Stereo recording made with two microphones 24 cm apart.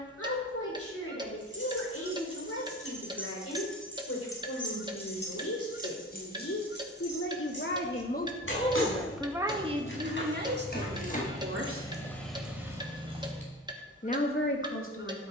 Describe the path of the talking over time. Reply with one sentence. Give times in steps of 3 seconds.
You can hear the talking on the left from 0 s, on the right from 9 s and on the left from 12 s.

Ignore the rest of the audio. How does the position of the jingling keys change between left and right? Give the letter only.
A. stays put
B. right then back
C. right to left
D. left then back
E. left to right
D.